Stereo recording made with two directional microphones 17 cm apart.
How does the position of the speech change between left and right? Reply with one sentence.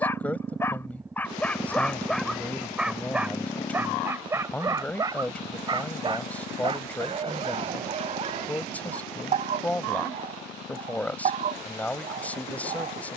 You can hear the speech stay in one place.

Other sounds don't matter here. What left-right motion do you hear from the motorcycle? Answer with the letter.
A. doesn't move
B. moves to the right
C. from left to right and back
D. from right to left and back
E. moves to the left
E.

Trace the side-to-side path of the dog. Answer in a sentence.
In this clip you hear the dog travel towards the right.